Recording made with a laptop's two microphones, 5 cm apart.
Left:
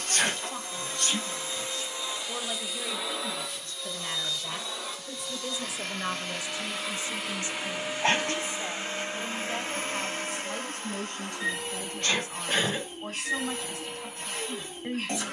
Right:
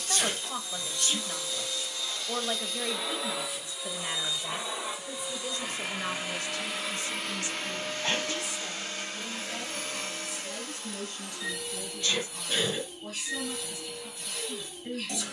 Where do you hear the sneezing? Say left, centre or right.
left.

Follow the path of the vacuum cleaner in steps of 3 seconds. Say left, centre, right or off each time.
left, centre, centre, left, left.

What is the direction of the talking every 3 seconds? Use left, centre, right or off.
right, centre, left, left, left.